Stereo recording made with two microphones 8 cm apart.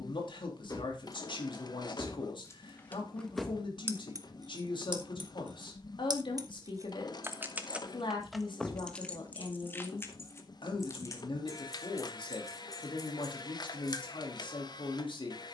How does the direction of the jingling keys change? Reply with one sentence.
In this clip you hear the jingling keys move from left to right and back again.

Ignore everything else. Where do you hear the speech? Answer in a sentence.
You can hear the speech on the left.